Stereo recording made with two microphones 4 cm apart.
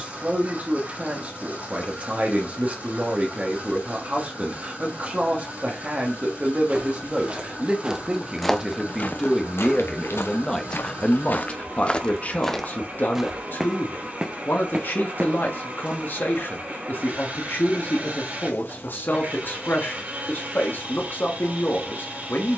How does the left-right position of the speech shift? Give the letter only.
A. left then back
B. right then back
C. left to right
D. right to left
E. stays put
D.